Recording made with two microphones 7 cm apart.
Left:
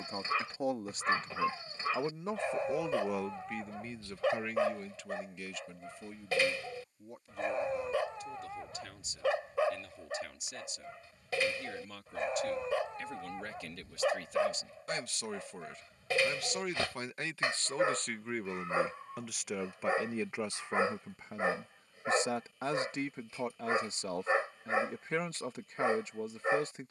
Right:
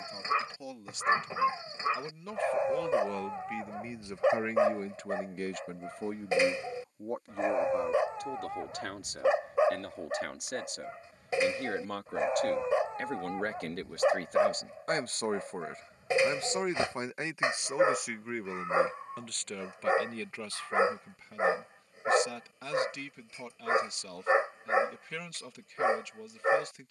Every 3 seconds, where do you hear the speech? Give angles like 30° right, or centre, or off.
30° left, 30° right, 70° right, 70° right, 60° right, 30° right, 10° left, 30° left, 30° left.